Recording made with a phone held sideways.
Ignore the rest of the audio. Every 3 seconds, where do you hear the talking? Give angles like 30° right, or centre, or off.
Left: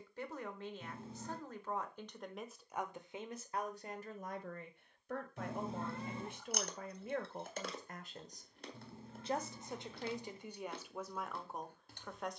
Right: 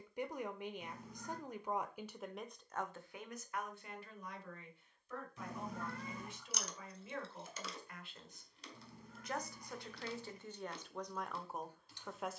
10° right, 50° left, 50° left, 10° left.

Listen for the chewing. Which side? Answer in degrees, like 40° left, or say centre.
50° left.